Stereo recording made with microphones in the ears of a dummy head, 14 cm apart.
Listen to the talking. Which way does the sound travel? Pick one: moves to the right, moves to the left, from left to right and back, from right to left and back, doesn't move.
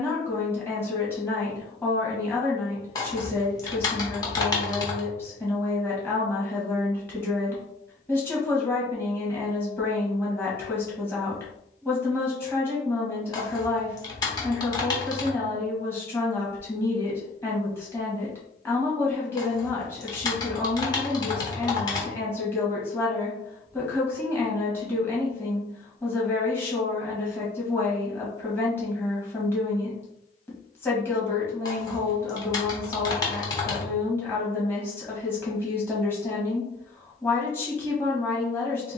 doesn't move.